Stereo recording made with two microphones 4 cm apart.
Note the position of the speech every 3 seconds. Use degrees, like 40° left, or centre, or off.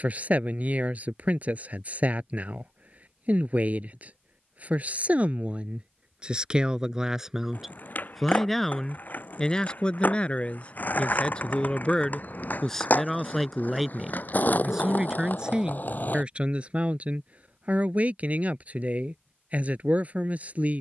40° right, 30° right, 10° right, 20° left, centre, 30° right, 30° right.